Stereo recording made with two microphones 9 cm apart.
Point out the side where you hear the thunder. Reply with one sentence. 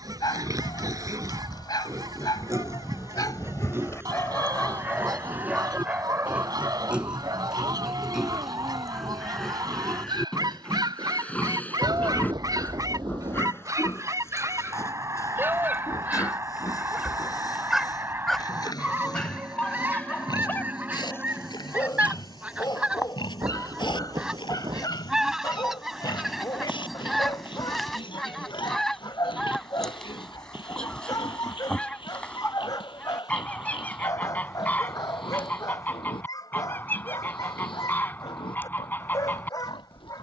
In this clip you hear the thunder on the right.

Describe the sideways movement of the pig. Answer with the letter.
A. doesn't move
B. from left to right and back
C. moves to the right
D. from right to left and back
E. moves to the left
E.